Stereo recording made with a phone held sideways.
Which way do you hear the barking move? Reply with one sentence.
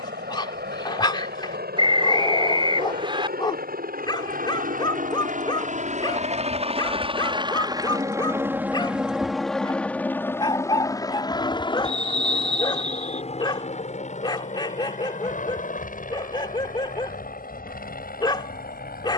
In this clip you hear the barking stay in one place.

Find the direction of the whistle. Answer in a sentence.
In this clip you hear the whistle on the right.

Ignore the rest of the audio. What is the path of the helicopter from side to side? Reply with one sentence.
In this clip you hear the helicopter travel towards the left.